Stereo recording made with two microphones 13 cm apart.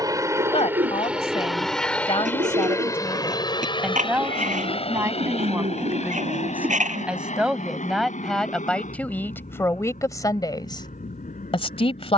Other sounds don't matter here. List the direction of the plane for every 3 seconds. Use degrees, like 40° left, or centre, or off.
centre, 40° left, 60° left, 70° left.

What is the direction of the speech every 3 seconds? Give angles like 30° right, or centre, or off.
40° left, 10° right, centre, 30° left.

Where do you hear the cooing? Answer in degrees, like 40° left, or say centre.
80° right.